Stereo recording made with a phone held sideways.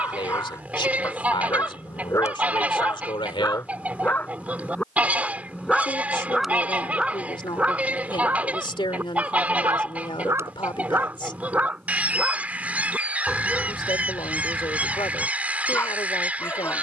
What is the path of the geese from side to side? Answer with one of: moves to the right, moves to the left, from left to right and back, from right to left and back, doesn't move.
doesn't move.